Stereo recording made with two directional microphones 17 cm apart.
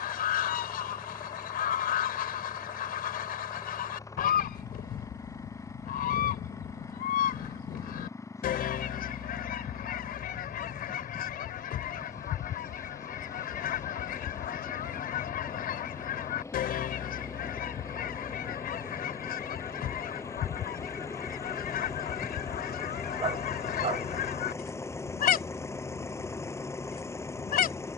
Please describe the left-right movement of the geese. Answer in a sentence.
In this clip you hear the geese stay put.